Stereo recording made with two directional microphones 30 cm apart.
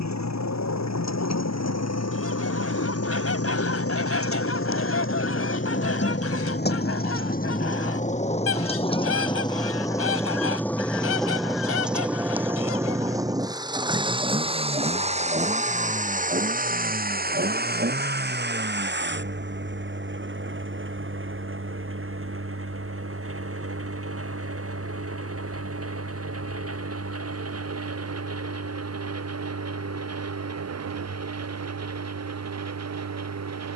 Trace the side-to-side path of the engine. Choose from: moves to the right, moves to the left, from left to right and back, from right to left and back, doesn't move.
moves to the right.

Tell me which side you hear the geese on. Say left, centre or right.
left.